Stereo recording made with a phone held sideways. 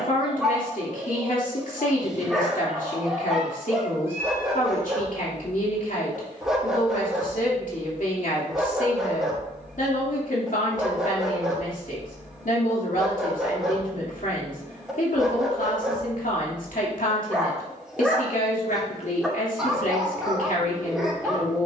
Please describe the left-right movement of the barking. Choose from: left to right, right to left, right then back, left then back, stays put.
stays put.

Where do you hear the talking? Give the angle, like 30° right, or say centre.
70° left.